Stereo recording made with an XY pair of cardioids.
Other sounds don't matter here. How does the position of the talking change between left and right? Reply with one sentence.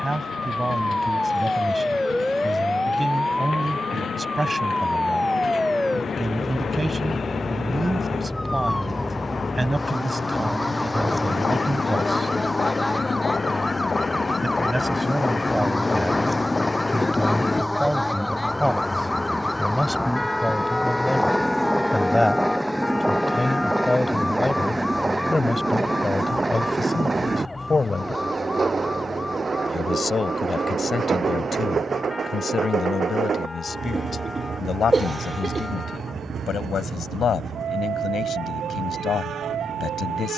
You can hear the talking move to the left.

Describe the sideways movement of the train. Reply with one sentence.
You can hear the train move to the right.